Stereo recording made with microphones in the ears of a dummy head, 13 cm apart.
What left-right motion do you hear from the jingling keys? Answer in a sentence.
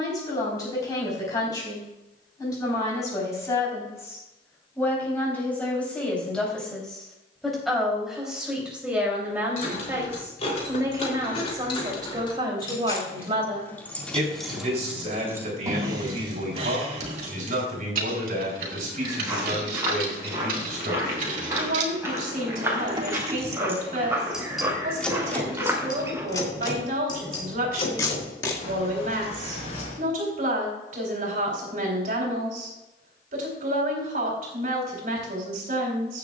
You can hear the jingling keys go right and come back.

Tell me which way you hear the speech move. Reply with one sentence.
You can hear the speech go from the left side to the right.